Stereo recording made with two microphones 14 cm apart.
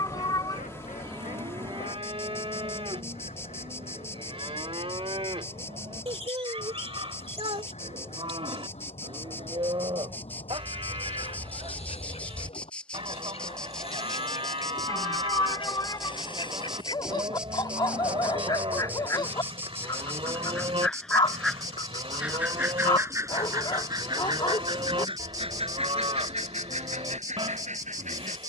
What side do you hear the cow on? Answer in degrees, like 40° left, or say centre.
40° right.